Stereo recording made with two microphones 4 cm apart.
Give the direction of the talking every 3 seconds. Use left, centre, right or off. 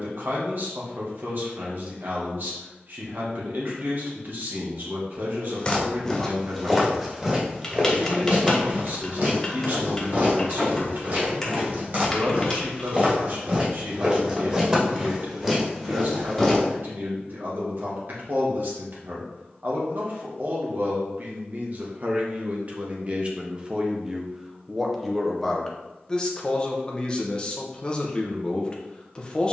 right, right, right, right, right, right, right, right, centre, left.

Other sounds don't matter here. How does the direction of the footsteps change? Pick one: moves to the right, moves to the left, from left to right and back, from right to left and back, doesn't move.
from left to right and back.